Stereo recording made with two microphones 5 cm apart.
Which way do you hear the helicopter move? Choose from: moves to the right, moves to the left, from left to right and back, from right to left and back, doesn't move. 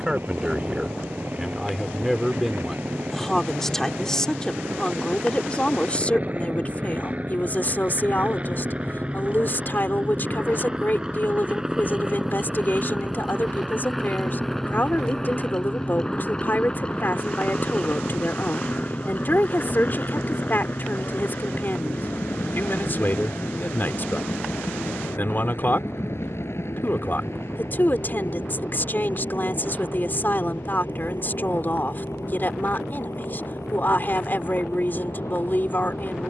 moves to the left.